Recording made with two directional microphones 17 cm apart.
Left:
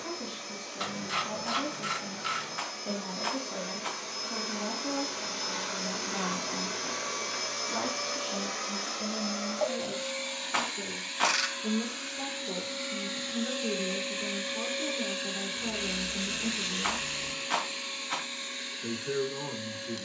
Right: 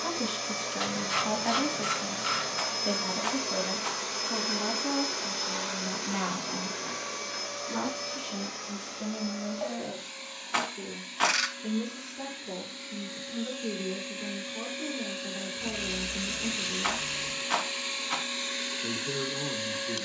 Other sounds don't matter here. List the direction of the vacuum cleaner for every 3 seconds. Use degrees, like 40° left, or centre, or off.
50° right, 20° right, 20° left, 40° left, 40° left, centre, 30° right.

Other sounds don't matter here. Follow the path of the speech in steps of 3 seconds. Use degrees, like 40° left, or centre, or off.
50° right, 30° right, 10° right, centre, 10° left, 10° left, 10° left.